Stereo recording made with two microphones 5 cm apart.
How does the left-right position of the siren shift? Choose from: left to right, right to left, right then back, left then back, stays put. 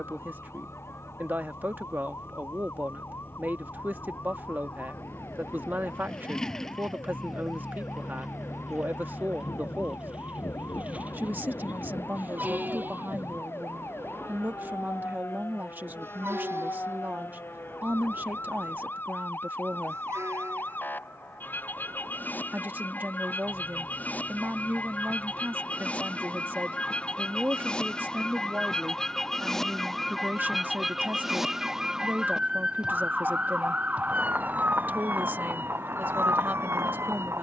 left to right.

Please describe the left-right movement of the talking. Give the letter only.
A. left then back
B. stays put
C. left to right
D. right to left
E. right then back
B.